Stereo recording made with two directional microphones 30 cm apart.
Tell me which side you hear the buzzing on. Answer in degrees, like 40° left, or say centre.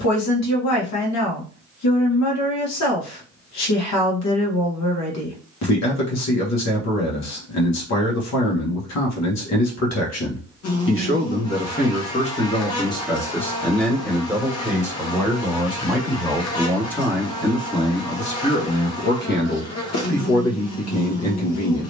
60° left.